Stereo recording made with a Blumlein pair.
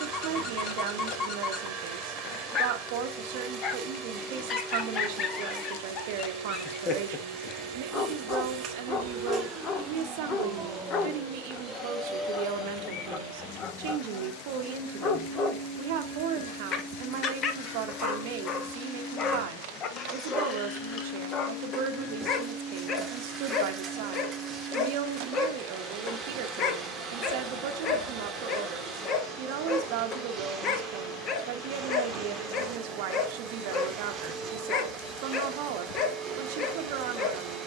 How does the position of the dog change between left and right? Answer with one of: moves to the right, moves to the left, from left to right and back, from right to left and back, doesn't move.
doesn't move.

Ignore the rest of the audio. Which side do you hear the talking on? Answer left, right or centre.
right.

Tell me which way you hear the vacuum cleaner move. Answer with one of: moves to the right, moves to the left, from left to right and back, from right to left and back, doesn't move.
from right to left and back.